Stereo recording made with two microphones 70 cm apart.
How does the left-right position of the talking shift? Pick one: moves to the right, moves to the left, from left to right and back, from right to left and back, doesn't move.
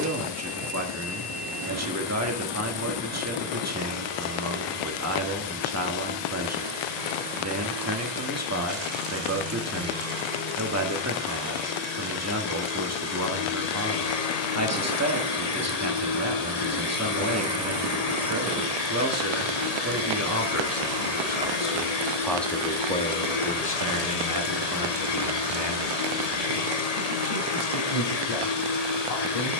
moves to the left.